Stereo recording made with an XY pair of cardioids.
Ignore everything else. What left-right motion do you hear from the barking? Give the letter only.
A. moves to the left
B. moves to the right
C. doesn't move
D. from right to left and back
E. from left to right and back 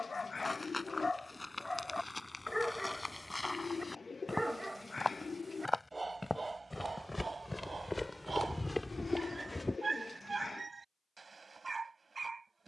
B.